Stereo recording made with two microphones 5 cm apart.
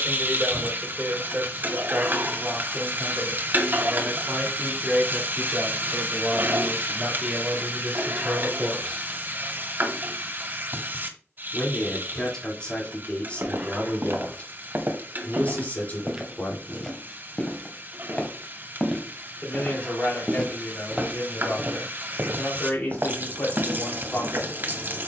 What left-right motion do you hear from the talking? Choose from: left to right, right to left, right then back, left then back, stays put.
right to left.